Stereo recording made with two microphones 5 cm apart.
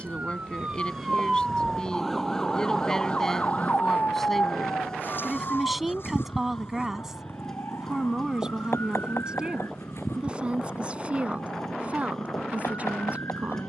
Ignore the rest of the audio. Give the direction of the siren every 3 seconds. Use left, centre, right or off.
centre, left, left, left, left.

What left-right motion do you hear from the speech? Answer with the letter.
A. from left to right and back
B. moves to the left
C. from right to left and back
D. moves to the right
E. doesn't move
D.